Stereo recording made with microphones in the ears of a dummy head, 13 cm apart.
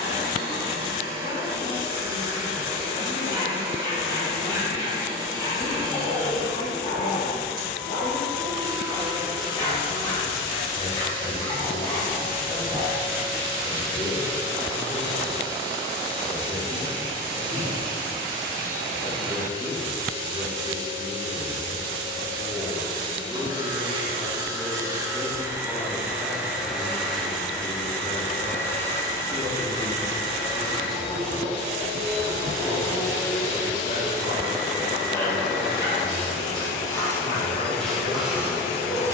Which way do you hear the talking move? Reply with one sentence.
In this clip you hear the talking go right and come back.